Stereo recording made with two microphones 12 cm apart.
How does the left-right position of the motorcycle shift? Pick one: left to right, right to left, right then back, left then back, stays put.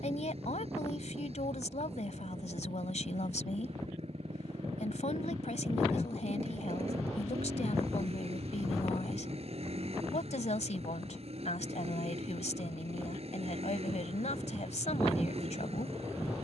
stays put.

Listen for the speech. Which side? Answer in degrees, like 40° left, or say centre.
80° left.